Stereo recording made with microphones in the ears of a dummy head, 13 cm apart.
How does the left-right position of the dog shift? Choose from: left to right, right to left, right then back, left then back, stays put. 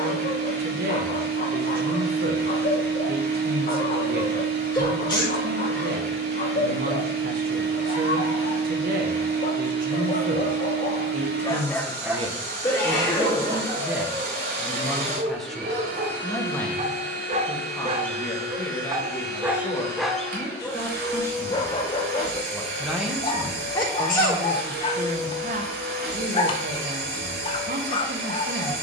right then back.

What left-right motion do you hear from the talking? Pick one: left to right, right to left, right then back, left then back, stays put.
left then back.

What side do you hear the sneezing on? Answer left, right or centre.
left.